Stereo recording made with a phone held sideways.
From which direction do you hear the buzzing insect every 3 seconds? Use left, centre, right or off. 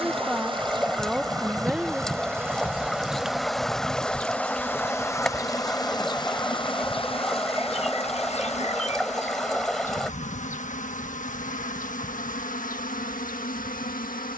right, centre, left, left, left.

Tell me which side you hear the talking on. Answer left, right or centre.
centre.